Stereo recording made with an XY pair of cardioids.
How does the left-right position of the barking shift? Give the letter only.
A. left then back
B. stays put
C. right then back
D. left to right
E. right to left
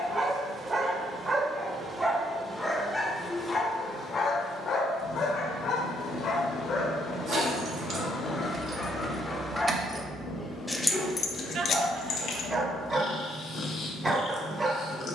A.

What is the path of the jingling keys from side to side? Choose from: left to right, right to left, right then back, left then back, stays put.
right to left.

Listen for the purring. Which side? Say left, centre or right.
left.